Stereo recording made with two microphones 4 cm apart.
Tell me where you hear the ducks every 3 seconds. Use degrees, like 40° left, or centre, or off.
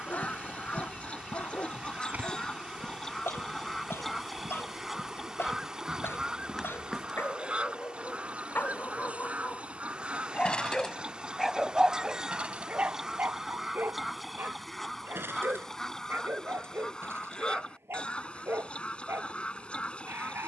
30° left, centre, 30° right, 30° right, 10° right, 10° left, 30° left.